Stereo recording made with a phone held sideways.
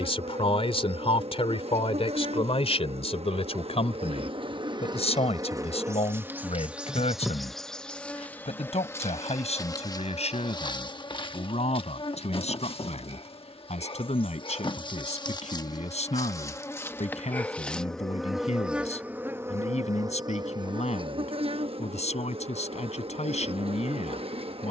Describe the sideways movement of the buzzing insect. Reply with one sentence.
In this clip you hear the buzzing insect move from right to left and back again.